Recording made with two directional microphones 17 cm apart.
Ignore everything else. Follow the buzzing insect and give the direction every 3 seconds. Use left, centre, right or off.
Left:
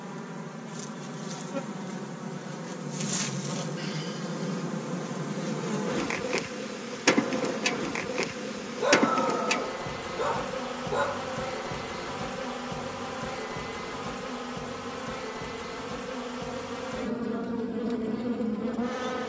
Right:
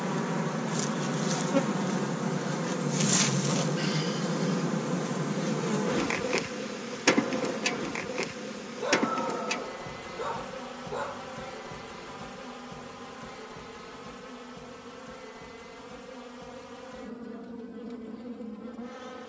right, right, centre, left, left, left, left.